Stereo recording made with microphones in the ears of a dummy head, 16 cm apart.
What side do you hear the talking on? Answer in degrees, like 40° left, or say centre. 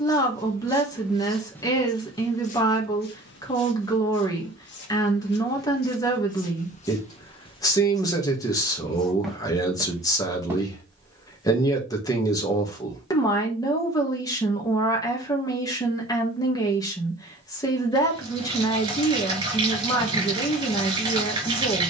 20° left.